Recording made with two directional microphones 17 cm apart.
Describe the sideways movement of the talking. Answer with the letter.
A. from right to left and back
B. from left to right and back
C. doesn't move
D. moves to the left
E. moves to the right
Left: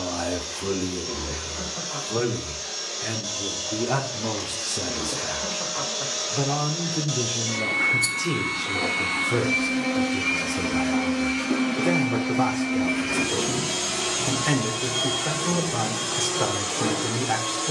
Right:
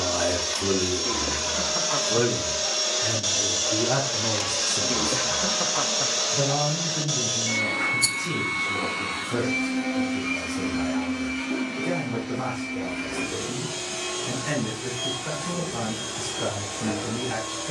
D.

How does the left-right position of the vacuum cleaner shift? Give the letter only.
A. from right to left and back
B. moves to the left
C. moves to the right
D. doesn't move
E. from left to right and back
B.